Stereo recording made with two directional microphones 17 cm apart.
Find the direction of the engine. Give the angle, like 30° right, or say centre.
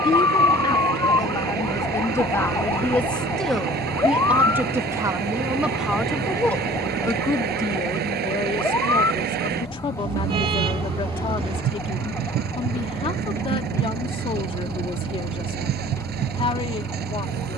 70° right.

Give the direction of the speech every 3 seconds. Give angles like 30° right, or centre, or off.
20° left, 10° right, 20° left, 30° left, 30° left, 30° left.